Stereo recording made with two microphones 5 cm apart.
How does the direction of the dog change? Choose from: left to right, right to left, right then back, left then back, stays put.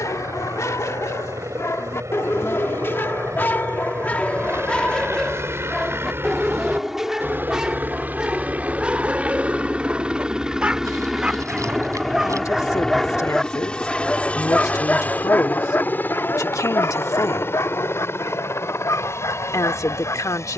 right then back.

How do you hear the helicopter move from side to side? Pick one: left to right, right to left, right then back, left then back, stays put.
right to left.